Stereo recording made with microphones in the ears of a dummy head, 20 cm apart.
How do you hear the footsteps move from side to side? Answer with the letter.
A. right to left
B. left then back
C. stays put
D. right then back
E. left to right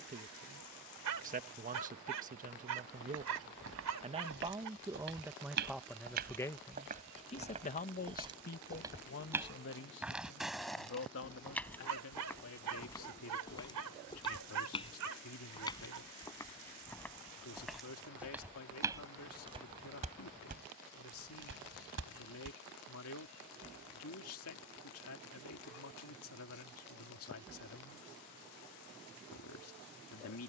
B.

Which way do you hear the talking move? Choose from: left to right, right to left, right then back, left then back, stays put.
right to left.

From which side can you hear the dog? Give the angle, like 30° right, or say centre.
80° right.